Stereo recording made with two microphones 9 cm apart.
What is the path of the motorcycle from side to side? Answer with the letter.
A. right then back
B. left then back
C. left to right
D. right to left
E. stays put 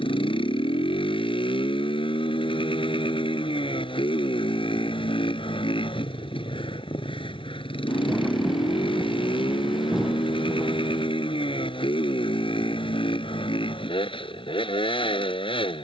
E.